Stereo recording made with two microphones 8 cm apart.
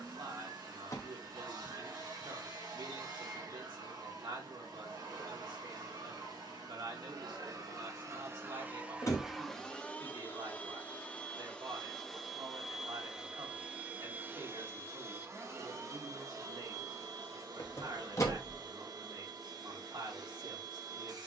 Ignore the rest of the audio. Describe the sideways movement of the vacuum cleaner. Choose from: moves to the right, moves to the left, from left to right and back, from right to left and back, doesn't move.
from right to left and back.